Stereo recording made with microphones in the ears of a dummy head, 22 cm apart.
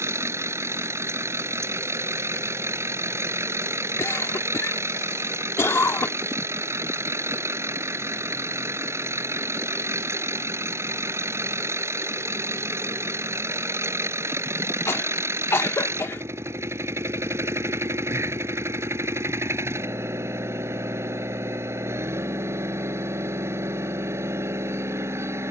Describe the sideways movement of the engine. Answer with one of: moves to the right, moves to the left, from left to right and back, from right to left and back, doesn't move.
doesn't move.